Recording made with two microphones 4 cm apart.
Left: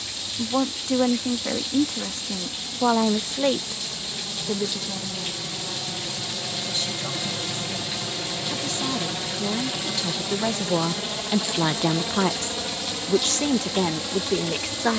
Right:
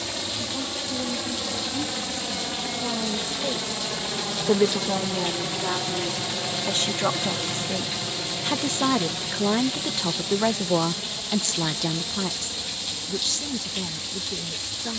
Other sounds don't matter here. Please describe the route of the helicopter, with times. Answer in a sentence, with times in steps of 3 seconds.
In this clip you hear the helicopter on the right from 0 s, in the centre from 6 s and on the left from 9 s.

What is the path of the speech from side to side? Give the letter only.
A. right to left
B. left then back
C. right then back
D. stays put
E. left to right
C.